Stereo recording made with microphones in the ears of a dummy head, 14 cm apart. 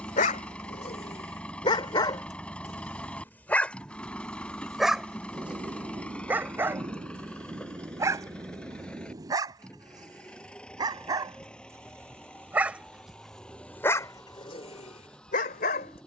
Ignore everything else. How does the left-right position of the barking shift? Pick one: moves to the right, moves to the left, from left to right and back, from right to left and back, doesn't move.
from left to right and back.